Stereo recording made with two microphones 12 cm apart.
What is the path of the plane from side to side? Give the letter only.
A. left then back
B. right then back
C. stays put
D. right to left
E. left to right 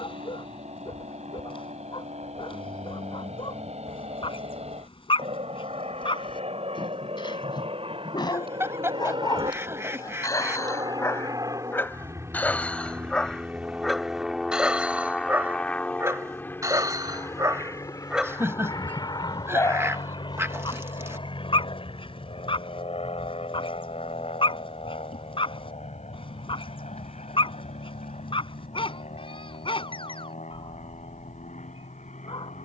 D.